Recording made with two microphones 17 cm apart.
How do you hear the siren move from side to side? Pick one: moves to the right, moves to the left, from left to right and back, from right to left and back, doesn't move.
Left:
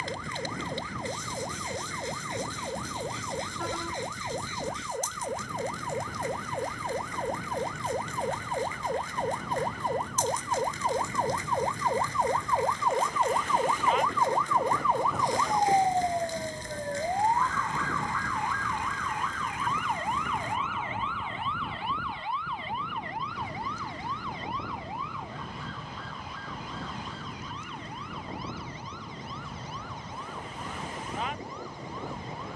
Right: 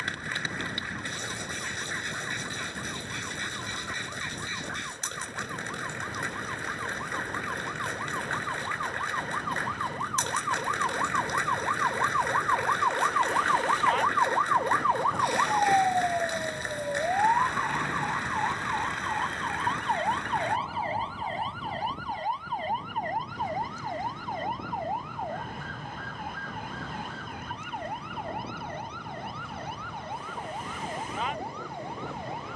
moves to the right.